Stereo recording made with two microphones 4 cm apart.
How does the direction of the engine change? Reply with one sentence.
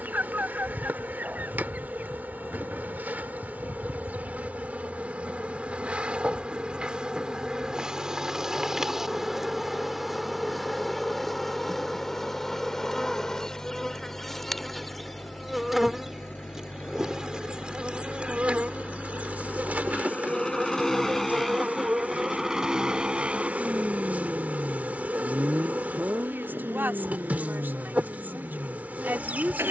In this clip you hear the engine travel towards the right.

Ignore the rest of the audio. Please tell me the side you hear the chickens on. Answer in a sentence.
You can hear the chickens on the right.